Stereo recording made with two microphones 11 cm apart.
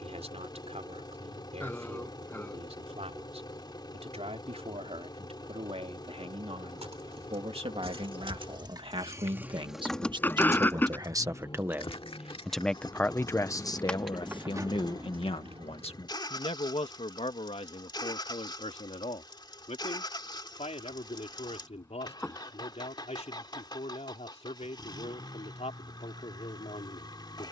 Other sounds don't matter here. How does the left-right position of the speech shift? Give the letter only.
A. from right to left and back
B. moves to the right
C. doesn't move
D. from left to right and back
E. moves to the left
E.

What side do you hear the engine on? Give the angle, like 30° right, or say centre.
40° left.